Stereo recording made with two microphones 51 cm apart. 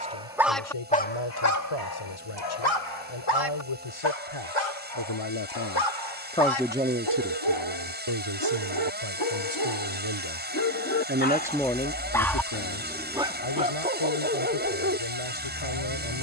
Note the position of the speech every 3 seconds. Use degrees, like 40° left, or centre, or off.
70° left, 60° left, 30° right, 40° right, 60° left, 70° left.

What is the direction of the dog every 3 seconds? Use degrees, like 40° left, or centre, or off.
30° left, 80° left, 60° left, 30° left, 10° right, 30° right.